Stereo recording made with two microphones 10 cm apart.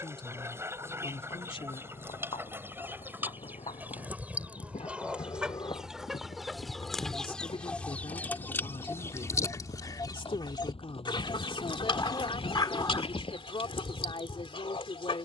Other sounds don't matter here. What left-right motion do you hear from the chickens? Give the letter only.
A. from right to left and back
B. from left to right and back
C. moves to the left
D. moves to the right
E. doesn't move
C.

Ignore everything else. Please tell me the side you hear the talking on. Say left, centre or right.
left.